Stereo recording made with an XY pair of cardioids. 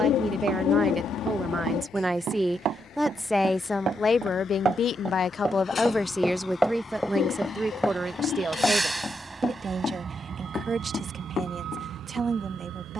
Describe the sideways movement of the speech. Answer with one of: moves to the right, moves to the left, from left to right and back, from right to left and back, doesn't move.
from right to left and back.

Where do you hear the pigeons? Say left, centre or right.
left.